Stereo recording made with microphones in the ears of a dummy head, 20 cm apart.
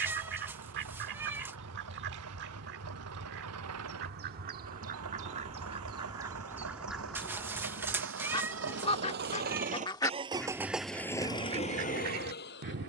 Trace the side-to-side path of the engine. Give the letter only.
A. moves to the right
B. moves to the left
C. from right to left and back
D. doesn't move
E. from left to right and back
B.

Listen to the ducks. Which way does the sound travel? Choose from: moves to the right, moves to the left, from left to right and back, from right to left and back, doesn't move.
from right to left and back.